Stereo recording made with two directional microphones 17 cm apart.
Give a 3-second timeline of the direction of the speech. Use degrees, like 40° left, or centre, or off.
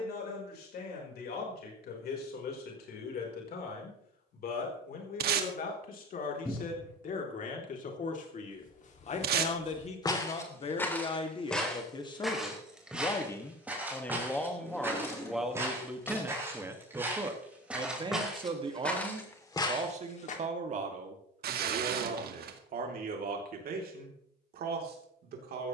60° left, 60° left, 50° left, 30° left, 10° left, 10° right, 40° right, 50° right, 60° right.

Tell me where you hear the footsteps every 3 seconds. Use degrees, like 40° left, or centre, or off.
off, off, 50° left, 20° left, 10° right, 10° right, 10° left, off, off.